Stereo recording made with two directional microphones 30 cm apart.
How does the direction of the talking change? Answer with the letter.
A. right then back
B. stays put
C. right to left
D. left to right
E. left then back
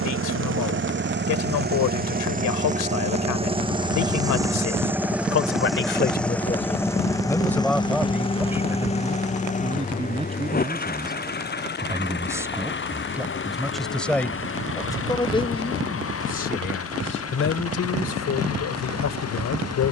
A.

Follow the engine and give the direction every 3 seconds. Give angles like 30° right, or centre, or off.
30° right, 10° right, 10° left, 30° left, 40° left, 50° left, 50° left.